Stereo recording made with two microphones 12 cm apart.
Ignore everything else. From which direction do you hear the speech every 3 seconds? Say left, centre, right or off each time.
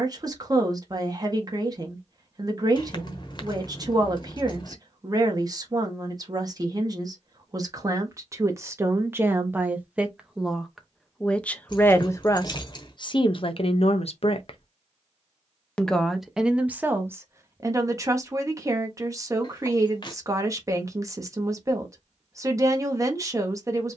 right, right, right, centre, left, centre, right, right.